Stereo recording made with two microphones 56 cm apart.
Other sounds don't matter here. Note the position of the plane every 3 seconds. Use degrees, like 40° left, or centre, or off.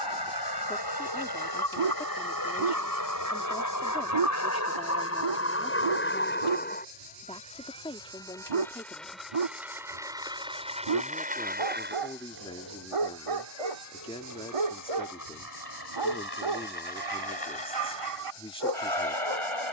40° left, 30° left, 10° left, 10° right, 30° right, 40° right, 50° right.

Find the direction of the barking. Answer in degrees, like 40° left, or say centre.
70° right.